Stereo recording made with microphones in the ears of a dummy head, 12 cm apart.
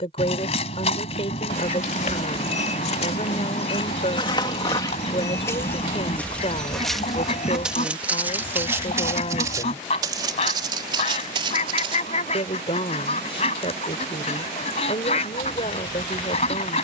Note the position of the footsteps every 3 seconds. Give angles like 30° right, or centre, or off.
50° left, 30° left, centre, 30° right, off, off.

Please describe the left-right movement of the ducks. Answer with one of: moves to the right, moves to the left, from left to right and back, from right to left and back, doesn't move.
doesn't move.